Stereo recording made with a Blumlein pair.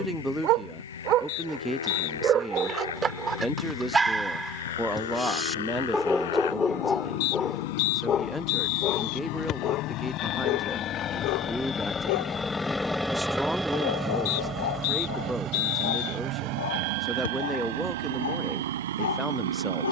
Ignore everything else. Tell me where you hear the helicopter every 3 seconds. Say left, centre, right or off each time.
left, left, left, left, centre, right, right.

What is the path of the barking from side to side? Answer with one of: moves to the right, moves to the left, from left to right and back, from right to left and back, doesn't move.
moves to the left.